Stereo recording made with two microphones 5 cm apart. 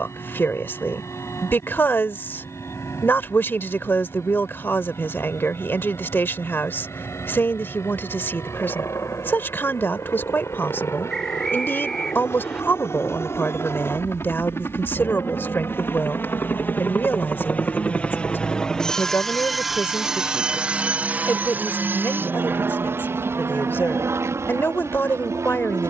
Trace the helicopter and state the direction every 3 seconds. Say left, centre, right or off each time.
left, left, left, left, left, left, centre, right, right.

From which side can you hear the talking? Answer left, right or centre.
left.